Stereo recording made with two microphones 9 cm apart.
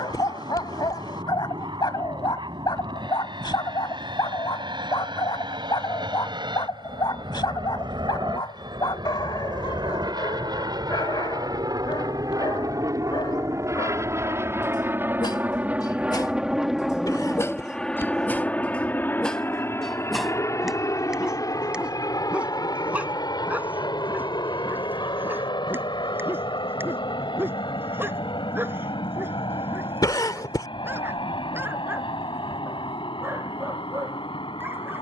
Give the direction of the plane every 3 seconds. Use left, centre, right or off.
right, right, right, right, right, centre, left, left, left, left, left, left.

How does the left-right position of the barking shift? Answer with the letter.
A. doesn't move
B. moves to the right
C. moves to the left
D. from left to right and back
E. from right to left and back
B.